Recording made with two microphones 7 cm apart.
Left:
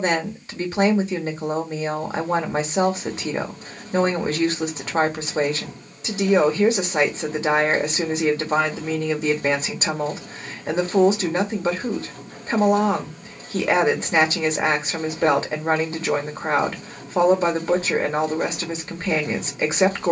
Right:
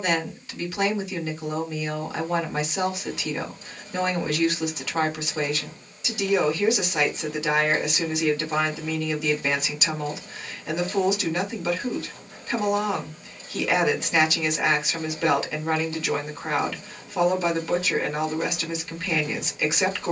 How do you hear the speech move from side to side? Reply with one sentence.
In this clip you hear the speech stay put.